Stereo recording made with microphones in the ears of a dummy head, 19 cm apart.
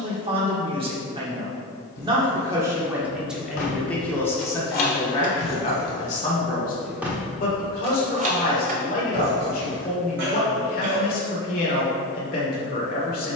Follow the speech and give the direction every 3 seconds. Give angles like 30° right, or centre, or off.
20° right, 10° left, 40° left, 40° left, 40° left.